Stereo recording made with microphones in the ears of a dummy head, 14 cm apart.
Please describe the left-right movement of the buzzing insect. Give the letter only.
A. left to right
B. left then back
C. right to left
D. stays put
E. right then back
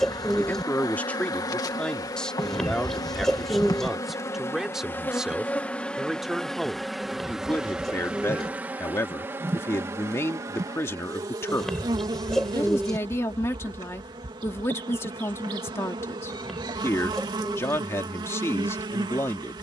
A.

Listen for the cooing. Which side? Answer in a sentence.
In this clip you hear the cooing in the centre.